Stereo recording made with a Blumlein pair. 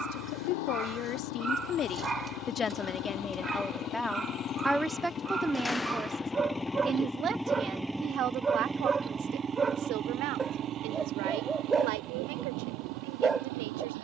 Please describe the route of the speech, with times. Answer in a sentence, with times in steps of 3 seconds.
In this clip you hear the speech on the left from 0 s, in the centre from 3 s and on the right from 6 s.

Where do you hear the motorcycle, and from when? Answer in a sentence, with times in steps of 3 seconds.
In this clip you hear the motorcycle on the left from 0 s, in the centre from 6 s and on the right from 9 s.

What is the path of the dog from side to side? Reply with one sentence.
You can hear the dog stay in one place.